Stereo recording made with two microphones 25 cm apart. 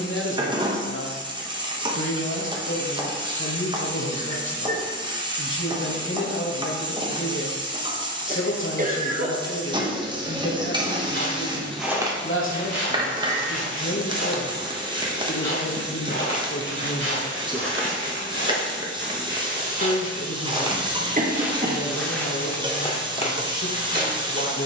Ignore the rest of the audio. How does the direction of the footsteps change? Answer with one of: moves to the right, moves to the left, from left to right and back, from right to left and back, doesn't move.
from left to right and back.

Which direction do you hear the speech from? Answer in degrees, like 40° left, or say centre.
50° left.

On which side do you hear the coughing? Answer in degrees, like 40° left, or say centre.
30° right.